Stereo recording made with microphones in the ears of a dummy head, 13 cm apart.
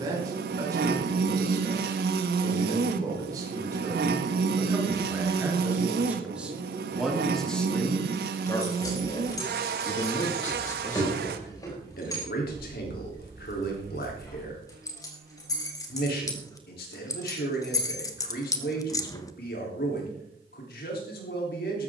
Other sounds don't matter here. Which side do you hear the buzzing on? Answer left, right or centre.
right.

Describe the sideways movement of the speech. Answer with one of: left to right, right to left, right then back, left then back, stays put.
right to left.